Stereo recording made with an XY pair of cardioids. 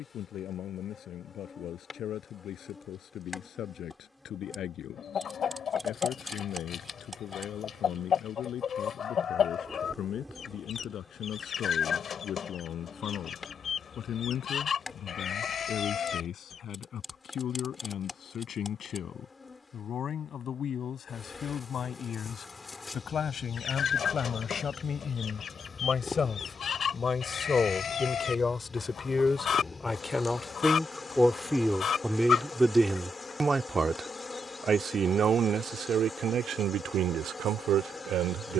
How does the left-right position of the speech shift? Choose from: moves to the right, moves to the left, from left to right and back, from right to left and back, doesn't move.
moves to the right.